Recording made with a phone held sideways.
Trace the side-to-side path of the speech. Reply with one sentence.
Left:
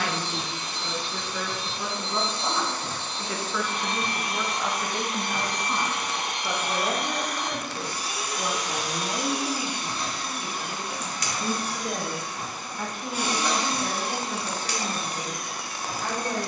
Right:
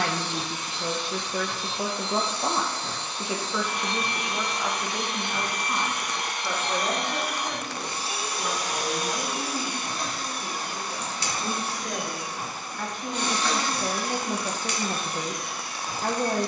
You can hear the speech go left and come back.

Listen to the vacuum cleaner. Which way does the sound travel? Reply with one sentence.
You can hear the vacuum cleaner move from left to right and back again.